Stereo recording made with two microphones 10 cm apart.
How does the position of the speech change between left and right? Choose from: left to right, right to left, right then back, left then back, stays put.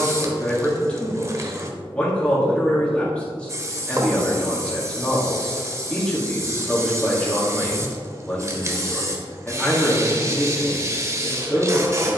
stays put.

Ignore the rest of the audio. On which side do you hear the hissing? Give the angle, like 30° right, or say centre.
30° right.